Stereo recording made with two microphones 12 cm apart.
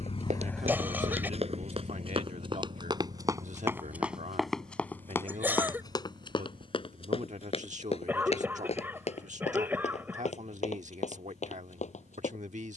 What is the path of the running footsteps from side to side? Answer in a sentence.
You can hear the running footsteps move from right to left.